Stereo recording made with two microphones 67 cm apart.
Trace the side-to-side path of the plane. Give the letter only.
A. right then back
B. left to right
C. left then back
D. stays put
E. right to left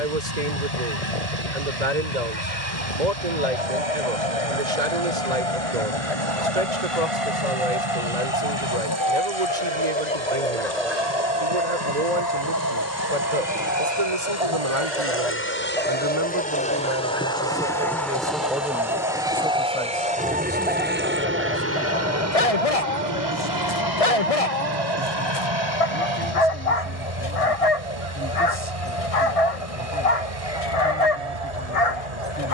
B.